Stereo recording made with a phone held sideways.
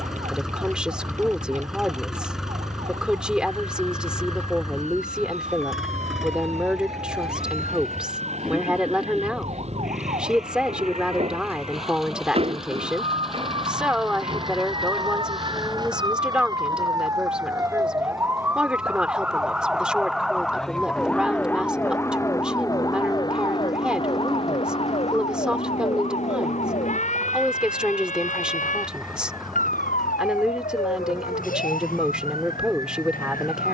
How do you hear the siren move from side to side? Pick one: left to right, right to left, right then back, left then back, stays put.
right to left.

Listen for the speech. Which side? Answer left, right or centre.
centre.